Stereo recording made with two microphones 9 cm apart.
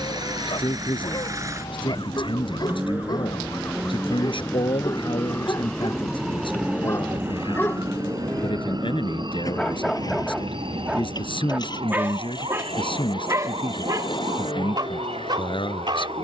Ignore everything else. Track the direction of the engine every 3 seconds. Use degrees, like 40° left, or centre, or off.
30° right, 10° right, 30° left, 40° left, 50° left, 60° left.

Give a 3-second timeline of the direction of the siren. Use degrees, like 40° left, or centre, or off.
50° left, 20° left, 30° right, 60° right, 70° right, 80° right.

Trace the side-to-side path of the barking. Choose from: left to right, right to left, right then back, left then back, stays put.
left to right.